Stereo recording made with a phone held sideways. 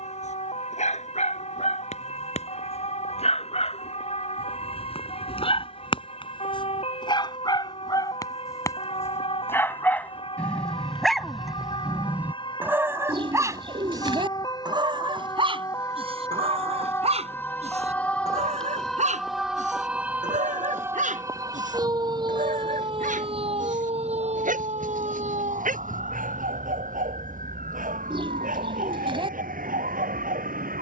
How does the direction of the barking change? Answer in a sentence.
You can hear the barking move to the right.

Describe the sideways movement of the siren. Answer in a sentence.
You can hear the siren move from left to right.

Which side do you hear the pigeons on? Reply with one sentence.
In this clip you hear the pigeons on the right.